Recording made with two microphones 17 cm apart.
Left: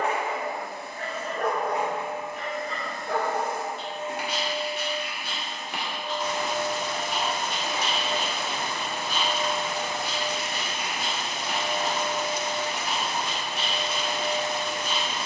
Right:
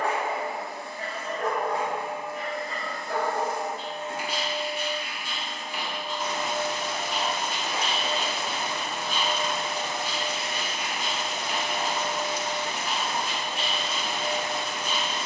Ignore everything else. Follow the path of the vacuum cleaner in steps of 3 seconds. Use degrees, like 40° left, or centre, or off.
20° left, 20° left, centre, 20° right, 30° right.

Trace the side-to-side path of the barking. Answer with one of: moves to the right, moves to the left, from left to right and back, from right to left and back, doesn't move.
doesn't move.